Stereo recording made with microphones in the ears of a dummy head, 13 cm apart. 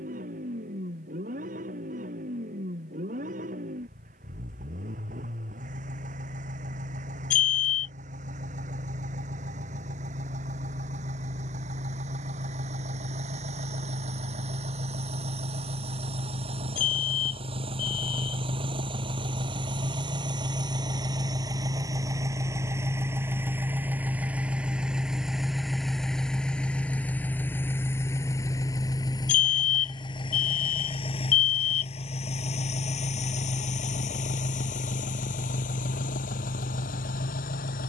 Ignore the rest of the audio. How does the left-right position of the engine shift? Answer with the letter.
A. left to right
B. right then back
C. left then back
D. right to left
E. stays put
D.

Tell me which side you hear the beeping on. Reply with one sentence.
In this clip you hear the beeping on the left.